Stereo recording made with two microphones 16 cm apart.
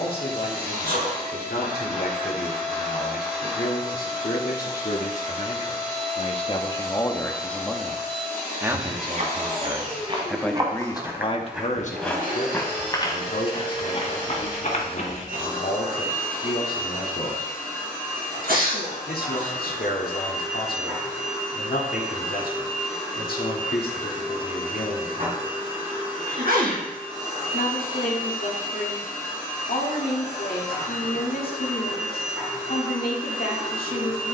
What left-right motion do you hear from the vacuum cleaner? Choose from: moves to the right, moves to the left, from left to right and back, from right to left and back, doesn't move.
doesn't move.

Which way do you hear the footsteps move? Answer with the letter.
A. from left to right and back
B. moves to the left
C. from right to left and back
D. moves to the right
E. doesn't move
B.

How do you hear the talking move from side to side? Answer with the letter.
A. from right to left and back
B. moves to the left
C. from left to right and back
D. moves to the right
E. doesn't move
C.